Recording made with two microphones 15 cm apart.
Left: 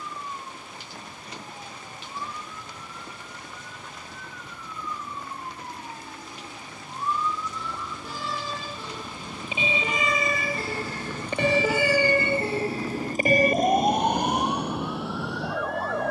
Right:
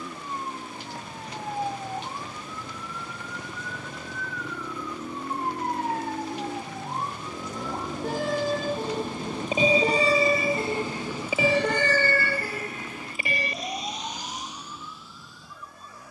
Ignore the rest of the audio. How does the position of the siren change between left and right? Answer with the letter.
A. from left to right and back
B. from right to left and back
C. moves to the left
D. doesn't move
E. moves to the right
C.